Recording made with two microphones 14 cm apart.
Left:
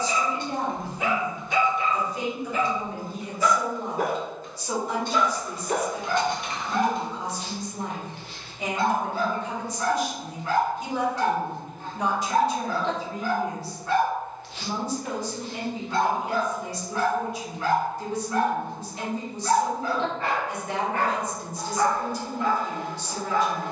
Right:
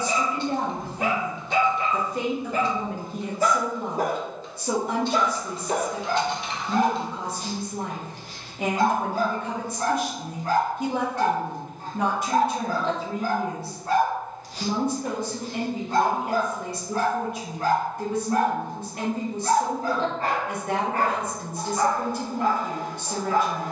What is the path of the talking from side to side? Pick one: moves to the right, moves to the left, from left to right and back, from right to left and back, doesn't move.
doesn't move.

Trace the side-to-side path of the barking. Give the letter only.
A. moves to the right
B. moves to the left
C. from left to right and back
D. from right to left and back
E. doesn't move
E.